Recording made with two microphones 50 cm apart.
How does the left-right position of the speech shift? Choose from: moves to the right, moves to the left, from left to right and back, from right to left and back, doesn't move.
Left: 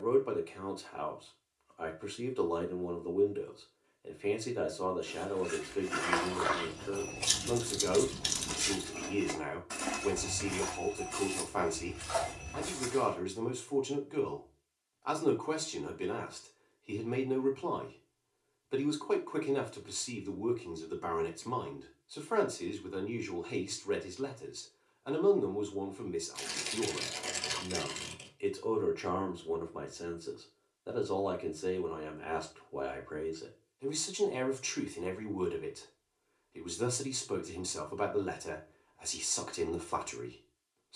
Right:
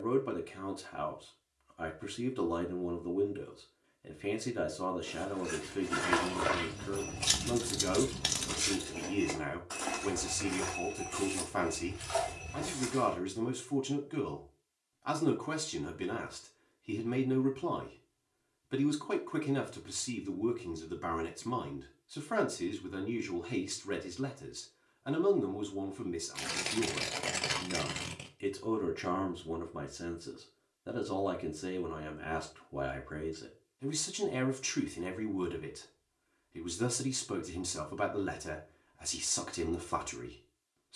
doesn't move.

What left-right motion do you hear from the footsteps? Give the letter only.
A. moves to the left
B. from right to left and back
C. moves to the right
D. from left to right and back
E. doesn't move
A.